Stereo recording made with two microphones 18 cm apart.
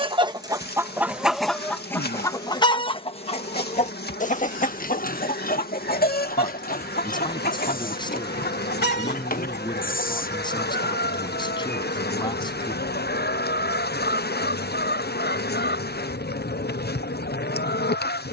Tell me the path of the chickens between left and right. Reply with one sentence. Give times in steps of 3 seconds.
In this clip you hear the chickens in the centre from 0 s and on the left from 3 s.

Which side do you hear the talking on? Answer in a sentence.
In this clip you hear the talking on the left.